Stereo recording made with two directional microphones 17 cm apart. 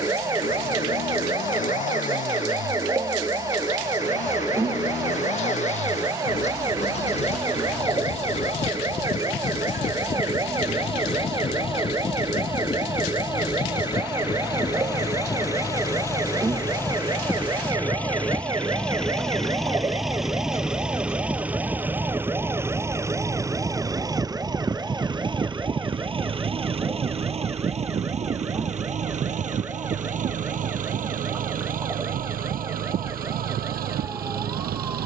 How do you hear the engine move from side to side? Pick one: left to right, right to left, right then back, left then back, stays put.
left to right.